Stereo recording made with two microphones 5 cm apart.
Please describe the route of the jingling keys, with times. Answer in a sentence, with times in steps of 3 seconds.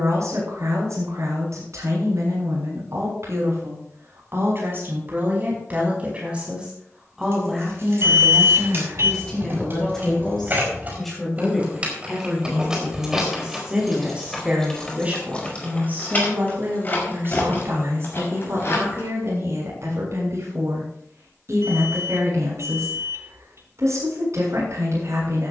In this clip you hear the jingling keys not at all from 0 s, on the right from 6 s, in the centre from 12 s, on the left from 15 s and not at all from 21 s.